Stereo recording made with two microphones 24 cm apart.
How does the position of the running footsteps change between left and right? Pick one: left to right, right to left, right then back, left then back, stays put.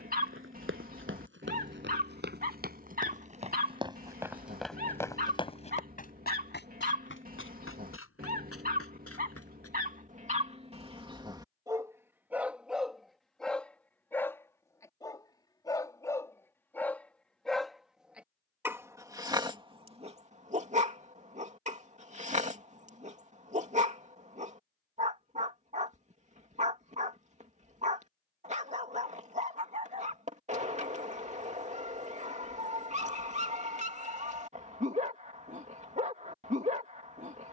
right to left.